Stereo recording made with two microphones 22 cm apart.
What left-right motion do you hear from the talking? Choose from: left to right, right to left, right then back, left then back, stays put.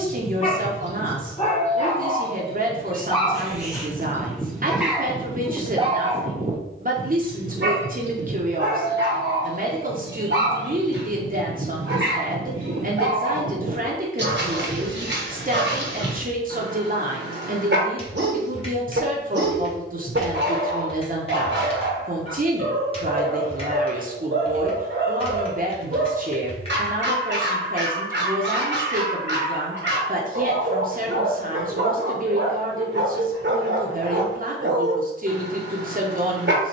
stays put.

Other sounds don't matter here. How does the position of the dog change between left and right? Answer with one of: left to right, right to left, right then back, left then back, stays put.
left to right.